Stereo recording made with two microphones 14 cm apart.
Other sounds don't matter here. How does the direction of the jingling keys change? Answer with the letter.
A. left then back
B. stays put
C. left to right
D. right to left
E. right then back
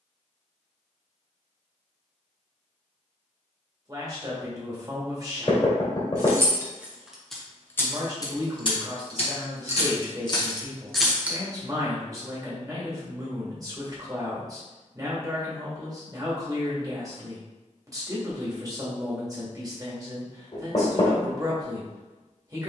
A.